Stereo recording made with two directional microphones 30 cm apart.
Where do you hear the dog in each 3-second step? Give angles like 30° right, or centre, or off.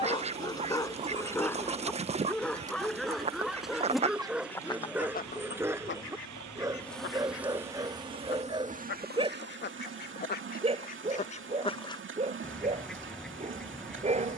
10° left, centre, 10° right, 20° right, 20° right.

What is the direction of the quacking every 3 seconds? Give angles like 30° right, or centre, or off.
20° right, centre, 40° left, 30° left, centre.